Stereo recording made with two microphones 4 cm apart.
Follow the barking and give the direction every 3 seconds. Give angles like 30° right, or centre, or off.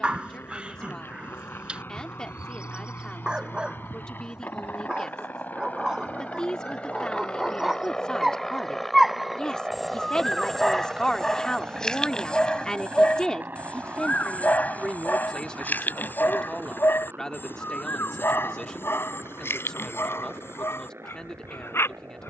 30° right, 20° right, 10° right, 10° left, 30° left, 50° left, 70° left, 80° left.